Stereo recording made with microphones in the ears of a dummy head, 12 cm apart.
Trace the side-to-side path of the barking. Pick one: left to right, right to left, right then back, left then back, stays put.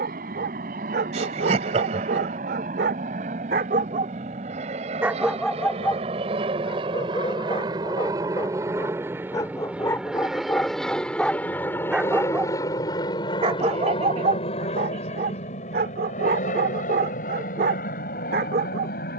left then back.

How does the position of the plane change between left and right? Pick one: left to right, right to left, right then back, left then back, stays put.
right to left.